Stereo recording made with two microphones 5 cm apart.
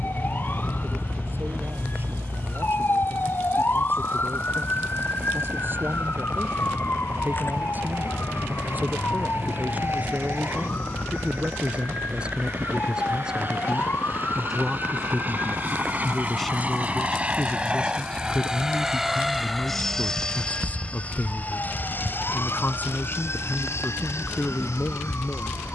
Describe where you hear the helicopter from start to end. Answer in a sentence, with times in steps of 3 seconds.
You can hear the helicopter on the right from 0 s, in the centre from 18 s and on the left from 21 s.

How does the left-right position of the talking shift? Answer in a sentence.
In this clip you hear the talking move to the left.